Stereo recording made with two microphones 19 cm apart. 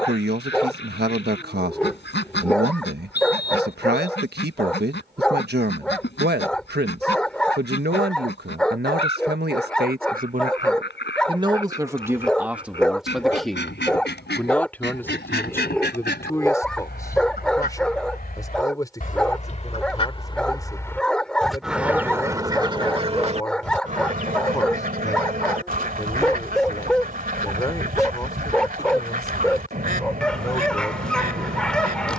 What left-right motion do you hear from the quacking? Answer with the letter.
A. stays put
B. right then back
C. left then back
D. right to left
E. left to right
E.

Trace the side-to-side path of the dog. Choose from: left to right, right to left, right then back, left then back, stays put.
stays put.